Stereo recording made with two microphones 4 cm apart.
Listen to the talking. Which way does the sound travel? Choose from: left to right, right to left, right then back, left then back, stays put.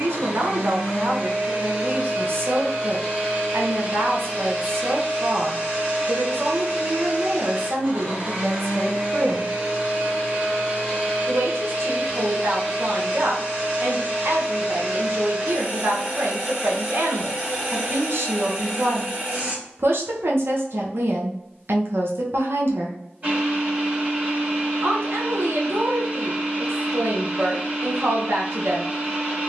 stays put.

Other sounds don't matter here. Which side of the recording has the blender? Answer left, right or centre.
right.